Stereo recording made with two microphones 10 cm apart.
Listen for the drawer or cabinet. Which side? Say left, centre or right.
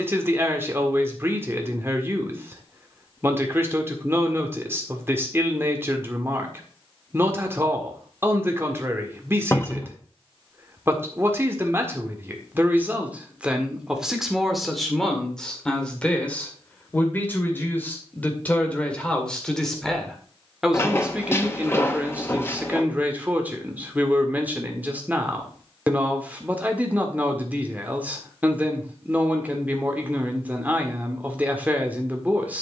left.